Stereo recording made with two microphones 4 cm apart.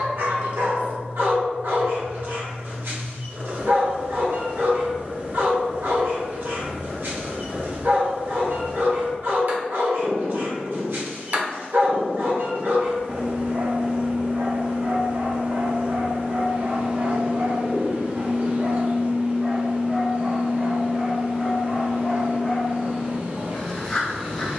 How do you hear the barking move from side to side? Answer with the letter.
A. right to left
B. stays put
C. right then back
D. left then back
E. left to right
A.